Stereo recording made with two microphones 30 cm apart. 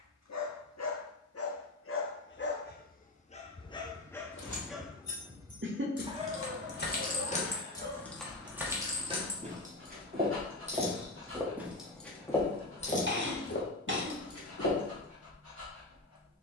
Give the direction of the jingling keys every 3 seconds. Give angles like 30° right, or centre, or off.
off, 60° left, 20° left, 20° right, 30° left, off.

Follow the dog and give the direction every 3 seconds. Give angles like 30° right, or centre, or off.
50° left, centre, 30° right, 40° right, 50° right, 50° right.